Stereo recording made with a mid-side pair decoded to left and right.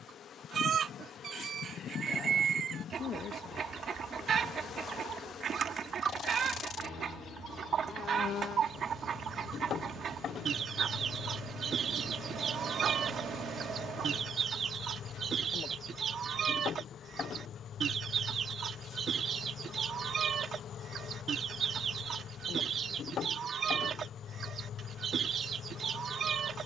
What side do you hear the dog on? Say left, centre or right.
right.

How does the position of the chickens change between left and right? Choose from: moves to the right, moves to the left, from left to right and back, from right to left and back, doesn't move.
doesn't move.